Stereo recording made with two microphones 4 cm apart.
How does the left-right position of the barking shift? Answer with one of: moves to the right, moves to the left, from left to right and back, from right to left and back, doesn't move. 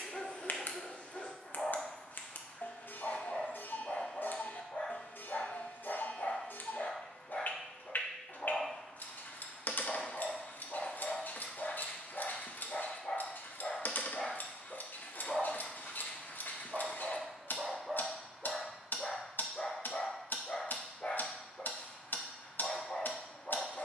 from left to right and back.